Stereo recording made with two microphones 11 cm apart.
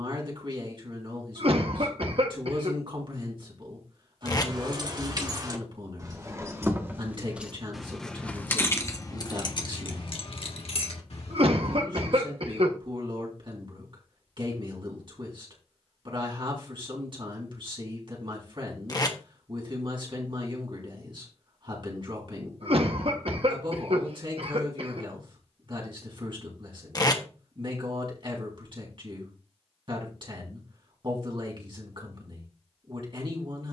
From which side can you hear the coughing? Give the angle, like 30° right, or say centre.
60° right.